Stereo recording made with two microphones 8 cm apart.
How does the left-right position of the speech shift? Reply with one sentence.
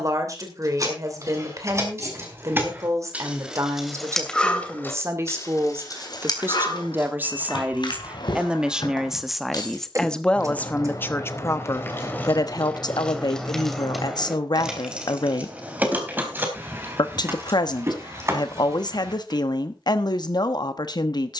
In this clip you hear the speech go from the right side to the left.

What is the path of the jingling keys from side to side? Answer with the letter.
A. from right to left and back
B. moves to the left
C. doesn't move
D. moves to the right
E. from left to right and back
A.